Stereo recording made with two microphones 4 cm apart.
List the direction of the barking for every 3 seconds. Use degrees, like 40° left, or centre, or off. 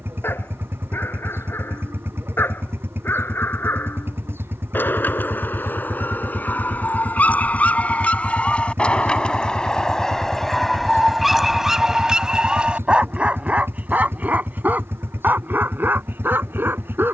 60° left, 50° left, 40° left, 10° left, 30° right, 60° right.